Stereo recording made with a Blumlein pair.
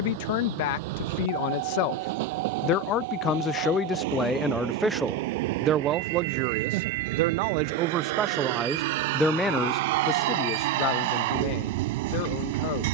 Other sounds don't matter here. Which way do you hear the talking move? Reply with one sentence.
You can hear the talking move from left to right and back again.